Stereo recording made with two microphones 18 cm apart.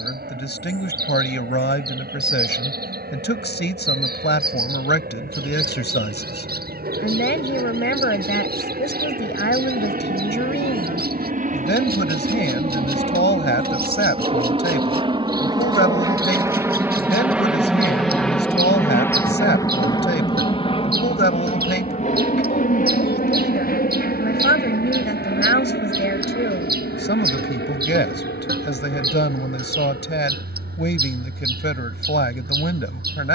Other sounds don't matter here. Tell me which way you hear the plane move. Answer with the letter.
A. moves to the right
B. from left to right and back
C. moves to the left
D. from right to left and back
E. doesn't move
C.